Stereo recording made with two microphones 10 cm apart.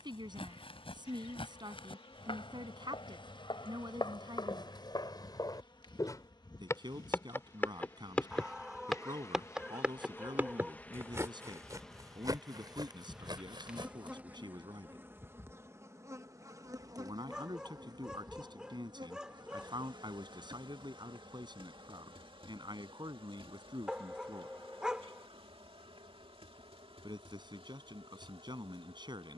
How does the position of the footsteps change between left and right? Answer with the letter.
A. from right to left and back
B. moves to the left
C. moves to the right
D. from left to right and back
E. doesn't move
C.